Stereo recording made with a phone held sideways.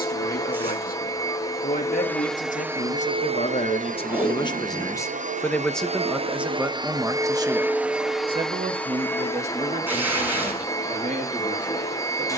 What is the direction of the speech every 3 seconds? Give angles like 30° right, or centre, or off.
60° left, 30° left, 20° right, 50° right.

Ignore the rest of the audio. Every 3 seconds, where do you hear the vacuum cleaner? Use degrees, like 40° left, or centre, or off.
10° left, 50° right, 10° right, 20° left.